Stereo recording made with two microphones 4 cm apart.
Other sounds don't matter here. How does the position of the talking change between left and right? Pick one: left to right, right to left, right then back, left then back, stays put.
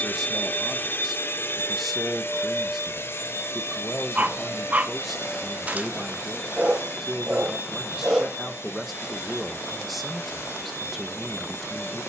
stays put.